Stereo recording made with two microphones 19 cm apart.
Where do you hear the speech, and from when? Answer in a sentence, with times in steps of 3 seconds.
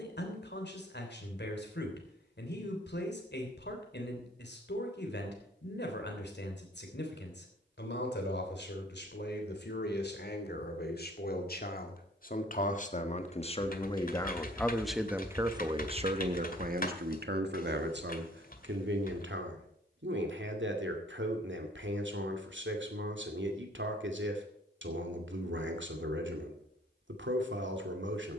In this clip you hear the speech on the left from 0 s and on the right from 15 s.